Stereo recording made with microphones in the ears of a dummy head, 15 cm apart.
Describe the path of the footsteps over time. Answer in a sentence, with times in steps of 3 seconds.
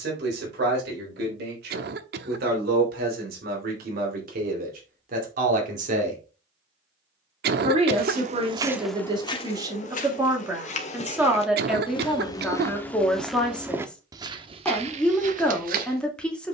You can hear the footsteps not at all from 0 s, on the right from 6 s, on the left from 9 s, in the centre from 12 s and on the right from 15 s.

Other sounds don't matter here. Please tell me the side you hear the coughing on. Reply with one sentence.
In this clip you hear the coughing on the right.